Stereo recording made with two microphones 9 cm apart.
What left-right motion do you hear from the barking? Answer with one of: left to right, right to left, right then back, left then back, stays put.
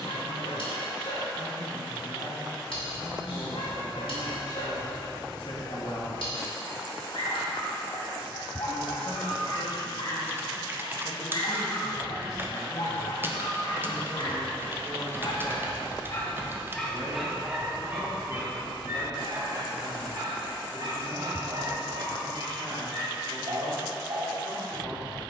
left to right.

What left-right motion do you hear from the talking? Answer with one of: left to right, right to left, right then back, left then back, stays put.
left to right.